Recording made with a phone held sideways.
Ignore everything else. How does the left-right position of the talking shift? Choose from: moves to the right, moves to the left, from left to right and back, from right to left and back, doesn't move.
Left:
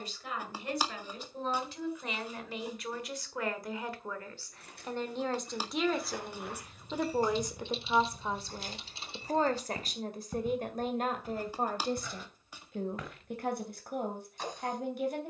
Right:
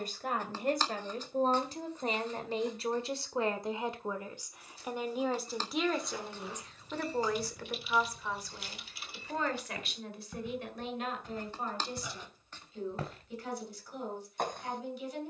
moves to the left.